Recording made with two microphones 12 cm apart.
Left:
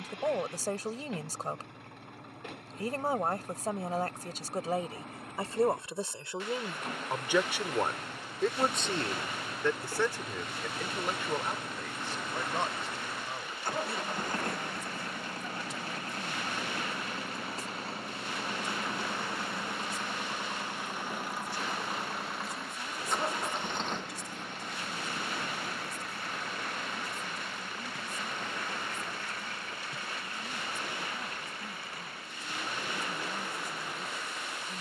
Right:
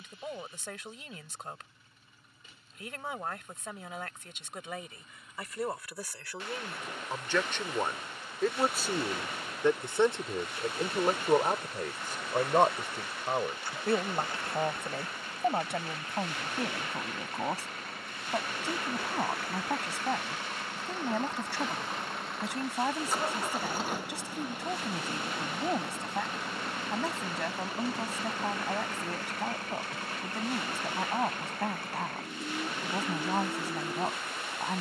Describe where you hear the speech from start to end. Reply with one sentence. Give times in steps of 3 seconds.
In this clip you hear the speech on the left from 0 s, in the centre from 6 s and on the right from 9 s.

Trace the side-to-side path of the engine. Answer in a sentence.
In this clip you hear the engine move from left to right.